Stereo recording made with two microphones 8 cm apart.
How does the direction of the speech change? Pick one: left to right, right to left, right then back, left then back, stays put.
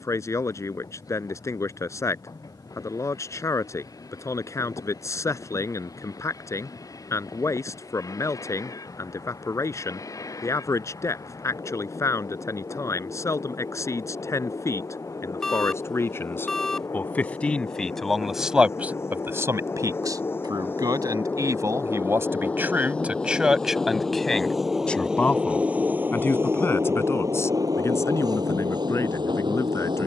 right then back.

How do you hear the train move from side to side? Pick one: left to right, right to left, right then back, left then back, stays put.
left to right.